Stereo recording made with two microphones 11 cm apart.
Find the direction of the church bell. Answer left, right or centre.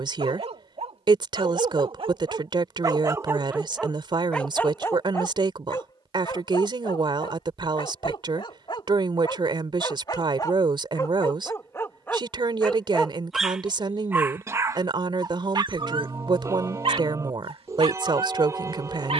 right.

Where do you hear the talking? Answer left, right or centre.
right.